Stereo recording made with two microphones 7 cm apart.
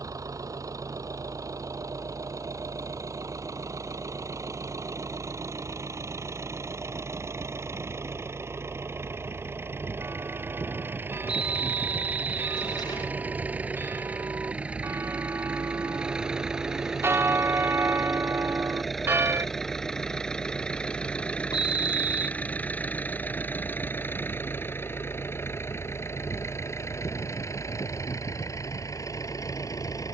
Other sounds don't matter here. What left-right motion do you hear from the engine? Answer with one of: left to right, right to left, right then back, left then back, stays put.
right to left.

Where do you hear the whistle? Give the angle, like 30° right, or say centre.
70° left.